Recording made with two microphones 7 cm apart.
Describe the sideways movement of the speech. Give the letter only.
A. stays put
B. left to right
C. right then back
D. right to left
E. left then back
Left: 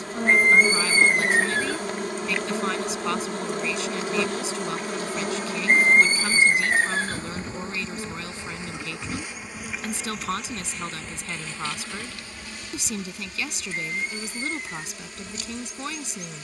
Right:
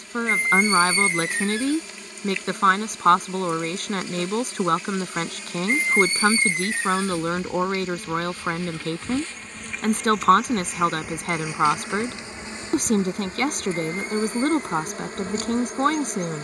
A.